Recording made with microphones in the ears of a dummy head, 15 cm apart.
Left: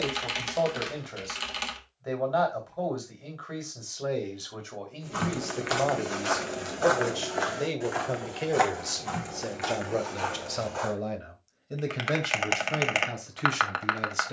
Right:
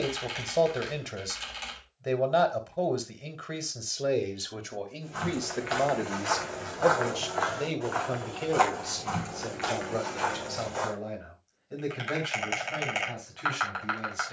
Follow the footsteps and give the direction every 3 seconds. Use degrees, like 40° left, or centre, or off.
off, 60° left, 30° left, centre, off.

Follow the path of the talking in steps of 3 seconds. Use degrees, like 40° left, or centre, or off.
30° right, 20° right, 10° left, 40° left, 50° left.